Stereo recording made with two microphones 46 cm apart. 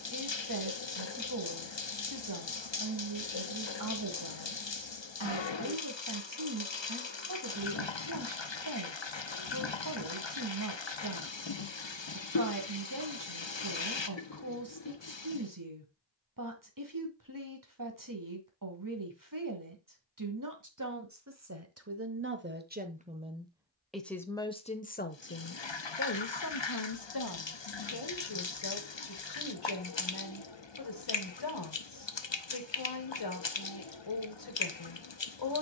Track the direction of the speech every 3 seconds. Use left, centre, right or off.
right, right, right, right, right, right, right, right, left, left, left, left.